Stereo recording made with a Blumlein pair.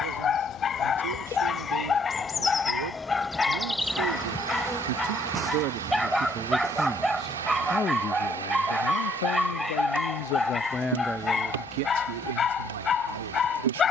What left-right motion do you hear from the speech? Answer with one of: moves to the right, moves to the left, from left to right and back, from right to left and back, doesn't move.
from right to left and back.